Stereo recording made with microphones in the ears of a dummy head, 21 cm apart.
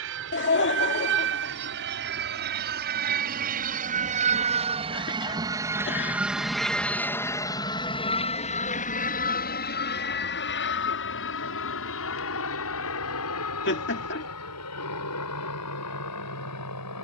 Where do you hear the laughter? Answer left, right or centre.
left.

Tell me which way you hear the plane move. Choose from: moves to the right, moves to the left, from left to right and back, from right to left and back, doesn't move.
moves to the left.